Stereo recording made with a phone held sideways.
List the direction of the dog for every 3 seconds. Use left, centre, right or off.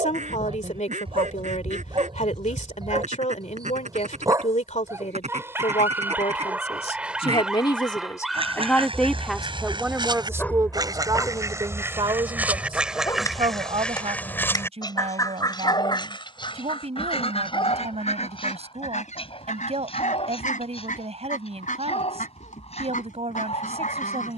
right, right, centre, centre, left, left, left, left.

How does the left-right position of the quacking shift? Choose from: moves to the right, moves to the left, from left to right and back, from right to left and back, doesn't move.
moves to the left.